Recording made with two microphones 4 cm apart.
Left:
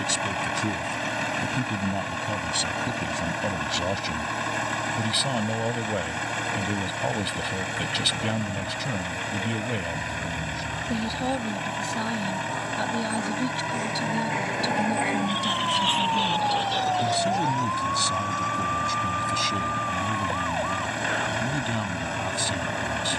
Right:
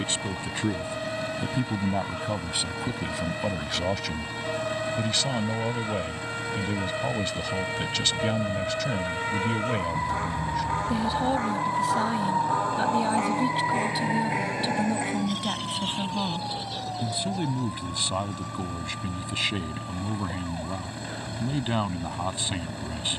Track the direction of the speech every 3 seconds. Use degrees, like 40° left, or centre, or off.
20° right, centre, 10° left, centre, 10° right, 20° right, 30° right, 30° right.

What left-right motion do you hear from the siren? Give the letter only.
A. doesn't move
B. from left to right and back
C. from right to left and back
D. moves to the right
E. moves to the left
E.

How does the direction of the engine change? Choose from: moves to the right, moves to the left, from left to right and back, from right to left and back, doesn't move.
doesn't move.